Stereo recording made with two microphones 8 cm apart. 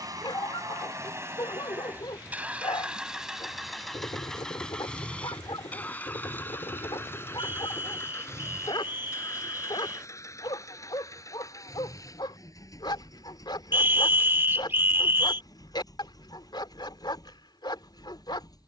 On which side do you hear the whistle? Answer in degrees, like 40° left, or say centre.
30° right.